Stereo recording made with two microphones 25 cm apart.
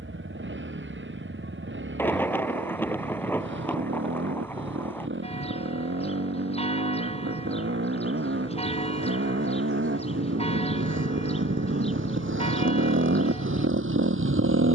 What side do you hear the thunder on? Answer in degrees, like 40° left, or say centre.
10° left.